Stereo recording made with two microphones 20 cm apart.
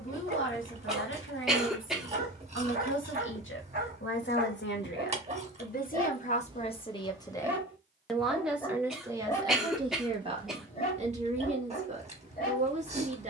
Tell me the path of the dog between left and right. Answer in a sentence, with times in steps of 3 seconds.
In this clip you hear the dog on the right from 0 s, in the centre from 6 s and on the left from 9 s.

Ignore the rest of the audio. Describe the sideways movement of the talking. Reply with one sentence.
You can hear the talking move to the right.